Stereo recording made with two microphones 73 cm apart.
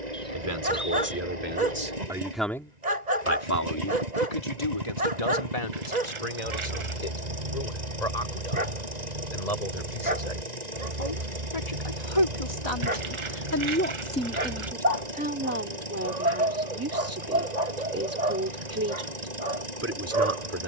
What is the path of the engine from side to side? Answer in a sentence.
In this clip you hear the engine stay in one place.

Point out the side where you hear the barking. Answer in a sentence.
In this clip you hear the barking on the right.